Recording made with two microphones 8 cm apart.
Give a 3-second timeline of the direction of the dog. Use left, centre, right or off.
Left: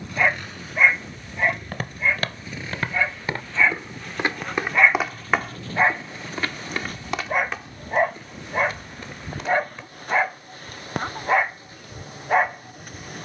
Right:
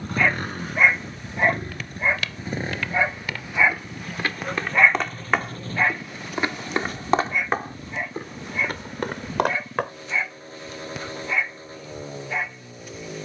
centre, centre, left, left, left.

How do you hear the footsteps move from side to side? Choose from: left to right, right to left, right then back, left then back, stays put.
left to right.